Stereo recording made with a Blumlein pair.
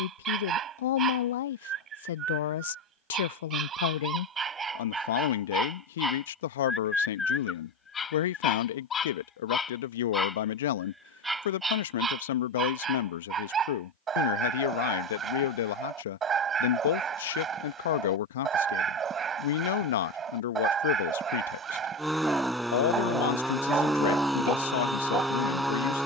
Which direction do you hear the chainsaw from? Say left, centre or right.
centre.